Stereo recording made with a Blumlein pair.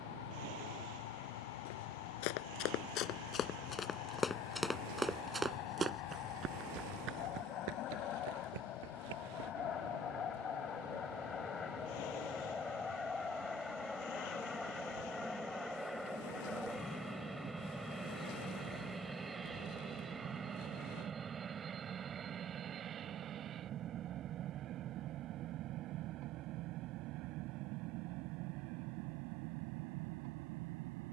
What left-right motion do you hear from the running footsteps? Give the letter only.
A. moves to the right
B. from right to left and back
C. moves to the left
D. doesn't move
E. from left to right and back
A.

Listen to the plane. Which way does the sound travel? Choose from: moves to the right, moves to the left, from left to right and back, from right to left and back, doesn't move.
moves to the right.